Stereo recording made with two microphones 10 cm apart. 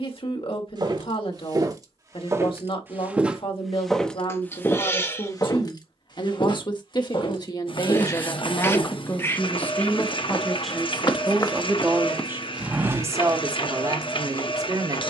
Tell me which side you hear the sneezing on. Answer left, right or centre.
left.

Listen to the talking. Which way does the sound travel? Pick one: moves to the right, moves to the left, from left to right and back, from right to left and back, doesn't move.
moves to the right.